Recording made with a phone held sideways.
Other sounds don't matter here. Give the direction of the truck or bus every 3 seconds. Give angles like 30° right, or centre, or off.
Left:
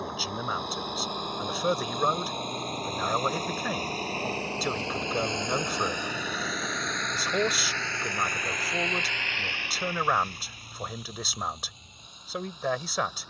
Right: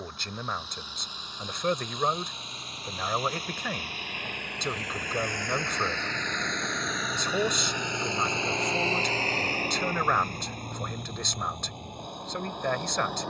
50° left, 30° left, 10° right, 50° right, 60° right.